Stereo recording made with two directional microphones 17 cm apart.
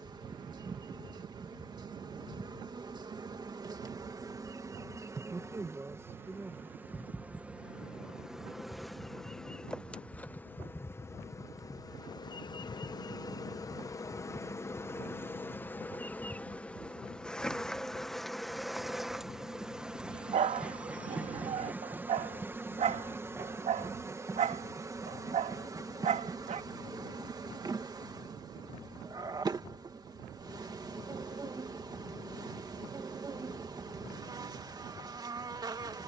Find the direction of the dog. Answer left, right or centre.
right.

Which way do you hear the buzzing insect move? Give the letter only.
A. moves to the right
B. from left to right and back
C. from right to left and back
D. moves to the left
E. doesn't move
C.